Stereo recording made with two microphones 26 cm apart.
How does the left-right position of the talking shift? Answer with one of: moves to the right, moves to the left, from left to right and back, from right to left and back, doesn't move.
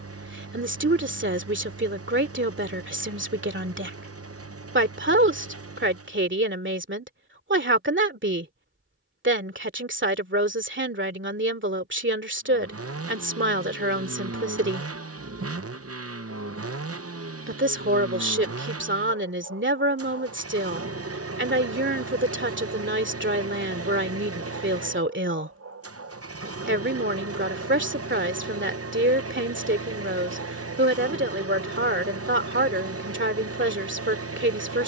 doesn't move.